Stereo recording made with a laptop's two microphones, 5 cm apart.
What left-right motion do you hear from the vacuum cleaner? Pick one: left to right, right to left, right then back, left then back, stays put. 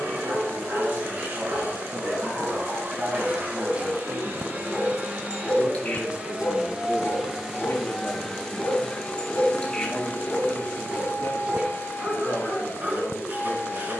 right to left.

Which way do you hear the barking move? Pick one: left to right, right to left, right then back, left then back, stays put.
left then back.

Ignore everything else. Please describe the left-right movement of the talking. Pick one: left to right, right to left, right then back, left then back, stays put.
right to left.